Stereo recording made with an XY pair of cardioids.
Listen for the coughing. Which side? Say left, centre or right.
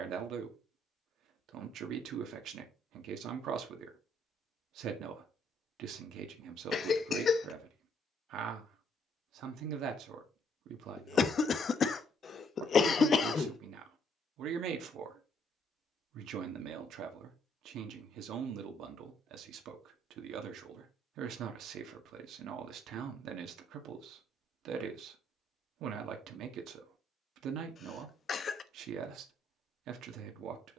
left.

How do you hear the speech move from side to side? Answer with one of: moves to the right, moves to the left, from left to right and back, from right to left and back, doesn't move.
doesn't move.